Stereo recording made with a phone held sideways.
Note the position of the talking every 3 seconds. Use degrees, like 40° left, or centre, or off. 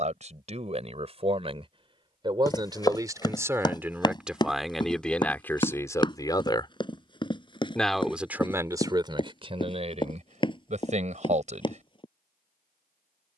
40° right, centre, centre, 40° right, off.